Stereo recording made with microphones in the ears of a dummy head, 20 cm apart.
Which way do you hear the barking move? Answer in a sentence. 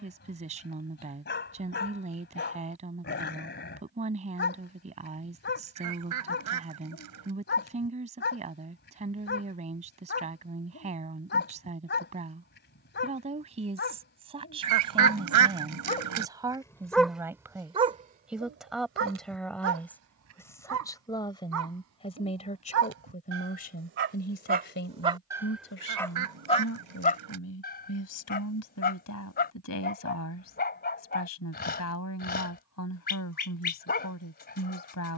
You can hear the barking go right and come back.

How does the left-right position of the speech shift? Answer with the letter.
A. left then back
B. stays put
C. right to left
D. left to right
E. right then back
C.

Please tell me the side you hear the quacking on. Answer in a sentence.
In this clip you hear the quacking on the right.